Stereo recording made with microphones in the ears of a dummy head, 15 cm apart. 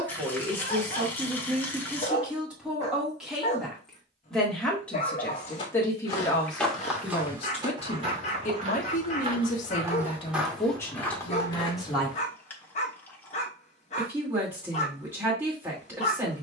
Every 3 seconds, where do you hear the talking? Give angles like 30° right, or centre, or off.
10° right, 10° left, 30° left, 20° left, 10° right, 10° right.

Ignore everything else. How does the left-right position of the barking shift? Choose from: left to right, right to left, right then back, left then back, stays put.
stays put.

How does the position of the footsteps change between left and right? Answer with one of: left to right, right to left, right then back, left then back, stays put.
right then back.